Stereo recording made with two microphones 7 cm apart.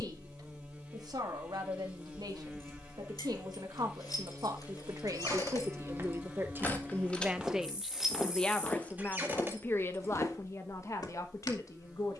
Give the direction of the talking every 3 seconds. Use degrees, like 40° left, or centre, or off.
70° right, 60° right, 10° right, 40° left.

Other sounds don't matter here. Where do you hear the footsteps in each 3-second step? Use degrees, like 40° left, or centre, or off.
off, 40° right, 10° right, 50° left.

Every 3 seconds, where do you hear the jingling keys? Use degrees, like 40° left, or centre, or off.
70° left, 60° left, 10° left, 30° right.